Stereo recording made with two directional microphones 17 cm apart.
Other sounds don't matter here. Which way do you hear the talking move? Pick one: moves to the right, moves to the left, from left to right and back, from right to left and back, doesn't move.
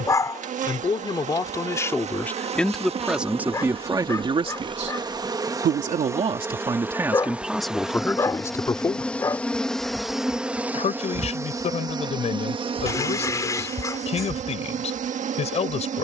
from left to right and back.